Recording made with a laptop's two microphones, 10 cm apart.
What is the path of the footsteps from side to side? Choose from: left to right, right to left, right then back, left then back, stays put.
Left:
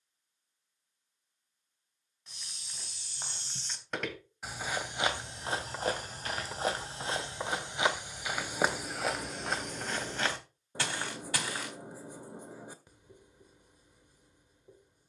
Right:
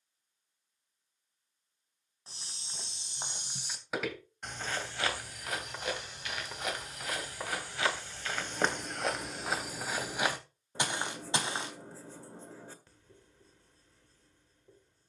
left then back.